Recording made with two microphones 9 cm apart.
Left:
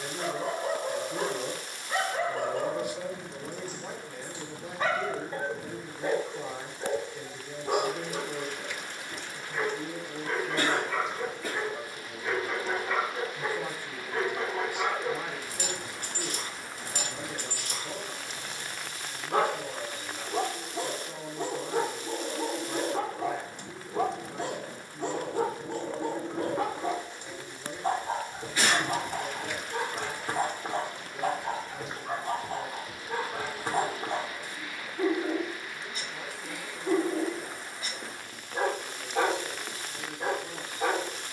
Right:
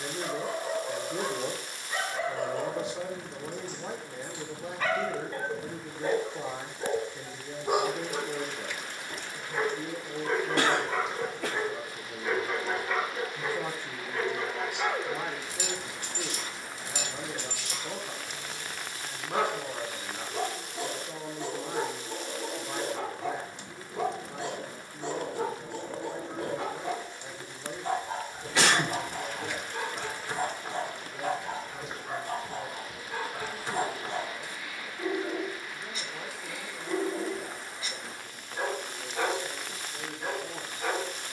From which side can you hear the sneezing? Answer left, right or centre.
right.